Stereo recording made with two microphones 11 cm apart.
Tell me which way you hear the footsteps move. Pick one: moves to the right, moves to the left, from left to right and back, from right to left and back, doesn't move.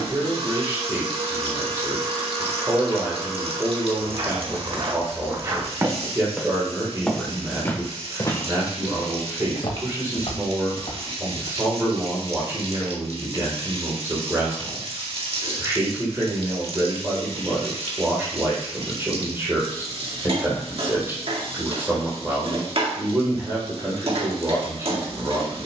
moves to the left.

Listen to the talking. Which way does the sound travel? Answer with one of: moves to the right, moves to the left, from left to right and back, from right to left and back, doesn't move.
doesn't move.